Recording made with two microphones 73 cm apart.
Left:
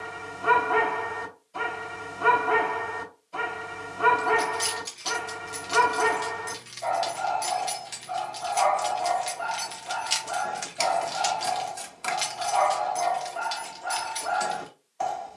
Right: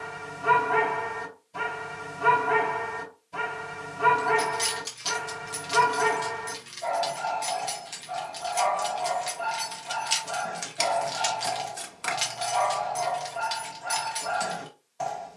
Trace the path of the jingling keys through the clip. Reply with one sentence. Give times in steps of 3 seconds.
In this clip you hear the jingling keys not at all from 0 s, on the right from 3 s, on the left from 6 s, in the centre from 9 s and on the right from 12 s.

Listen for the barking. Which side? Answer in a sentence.
In this clip you hear the barking on the right.